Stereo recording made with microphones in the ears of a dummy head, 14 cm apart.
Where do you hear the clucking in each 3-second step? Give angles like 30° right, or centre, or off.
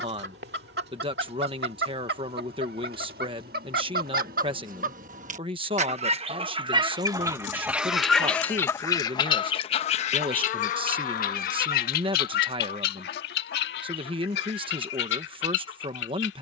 70° right, 60° right, 10° right, 40° left, 70° left, 70° left.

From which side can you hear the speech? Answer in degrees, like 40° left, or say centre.
30° right.